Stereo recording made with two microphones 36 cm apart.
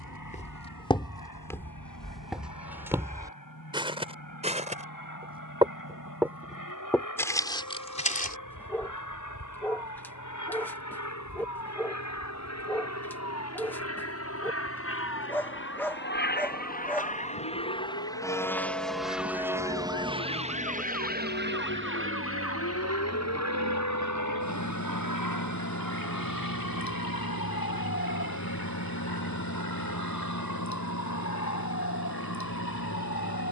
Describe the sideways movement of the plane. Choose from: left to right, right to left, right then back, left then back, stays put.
left to right.